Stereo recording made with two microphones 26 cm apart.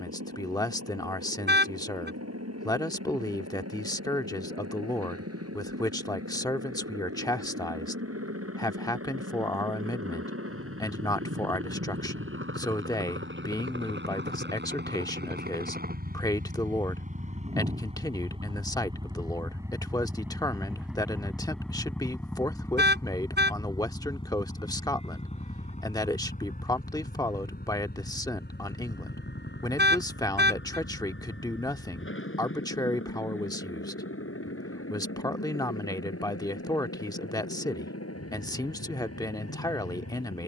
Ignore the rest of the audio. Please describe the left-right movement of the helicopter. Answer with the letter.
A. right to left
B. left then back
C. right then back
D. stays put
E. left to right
A.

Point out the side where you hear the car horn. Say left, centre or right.
right.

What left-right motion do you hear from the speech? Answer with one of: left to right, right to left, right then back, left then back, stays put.
stays put.